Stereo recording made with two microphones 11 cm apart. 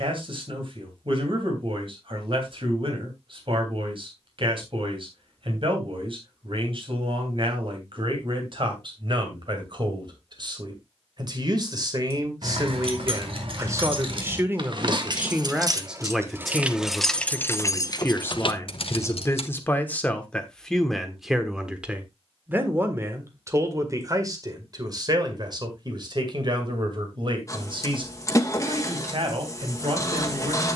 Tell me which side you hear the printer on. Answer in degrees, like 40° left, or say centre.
30° left.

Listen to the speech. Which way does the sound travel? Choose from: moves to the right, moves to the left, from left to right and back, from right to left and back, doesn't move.
from right to left and back.